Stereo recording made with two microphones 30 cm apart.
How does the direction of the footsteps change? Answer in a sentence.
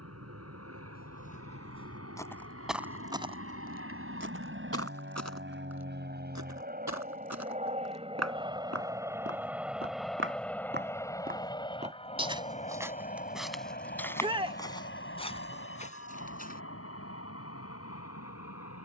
You can hear the footsteps move from left to right and back again.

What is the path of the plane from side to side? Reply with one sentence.
In this clip you hear the plane go from the right side to the left.